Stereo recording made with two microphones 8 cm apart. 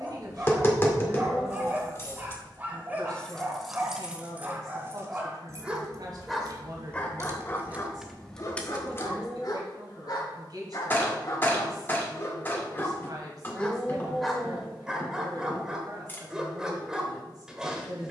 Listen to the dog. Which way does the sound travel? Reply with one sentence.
You can hear the dog go left and come back.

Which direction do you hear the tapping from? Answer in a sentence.
You can hear the tapping on the left.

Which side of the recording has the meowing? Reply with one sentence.
You can hear the meowing in the centre.